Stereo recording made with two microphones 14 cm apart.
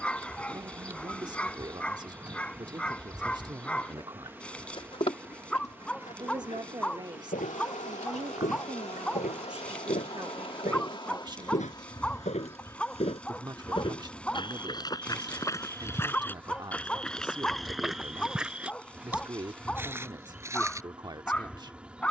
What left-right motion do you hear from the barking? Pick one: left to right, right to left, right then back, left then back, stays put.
stays put.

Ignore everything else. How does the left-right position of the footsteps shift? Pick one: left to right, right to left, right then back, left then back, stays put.
left to right.